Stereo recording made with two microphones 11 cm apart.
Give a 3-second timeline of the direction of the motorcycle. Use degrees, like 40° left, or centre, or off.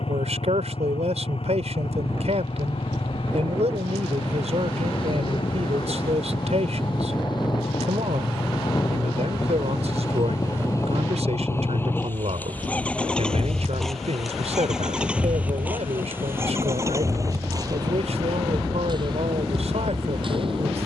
60° left, 50° left, 40° left, 30° left, 10° left, 20° right, 40° right.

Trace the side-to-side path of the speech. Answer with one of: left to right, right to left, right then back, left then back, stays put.
stays put.